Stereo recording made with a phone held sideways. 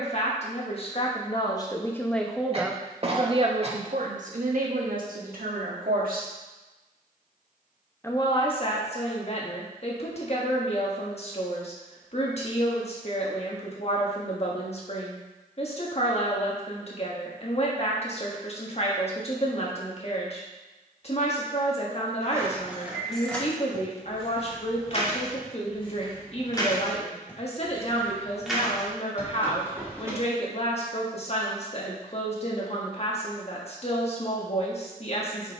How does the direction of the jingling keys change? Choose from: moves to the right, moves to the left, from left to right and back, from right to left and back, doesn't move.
from right to left and back.